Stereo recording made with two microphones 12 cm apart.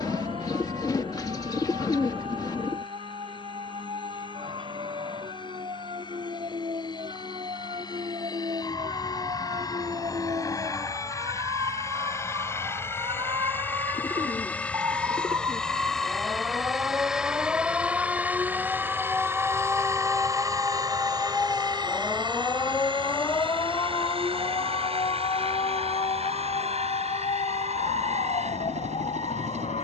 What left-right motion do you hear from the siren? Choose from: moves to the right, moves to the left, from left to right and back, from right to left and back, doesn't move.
moves to the left.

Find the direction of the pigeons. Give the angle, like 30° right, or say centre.
30° left.